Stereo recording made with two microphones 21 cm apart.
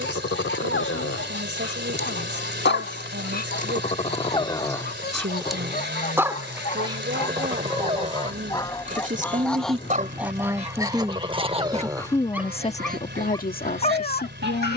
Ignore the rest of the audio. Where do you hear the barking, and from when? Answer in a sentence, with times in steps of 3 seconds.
You can hear the barking on the left from 0 s, on the right from 6 s and on the left from 12 s.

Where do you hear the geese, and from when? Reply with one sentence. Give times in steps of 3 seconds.
You can hear the geese on the left from 0 s, in the centre from 9 s and on the right from 12 s.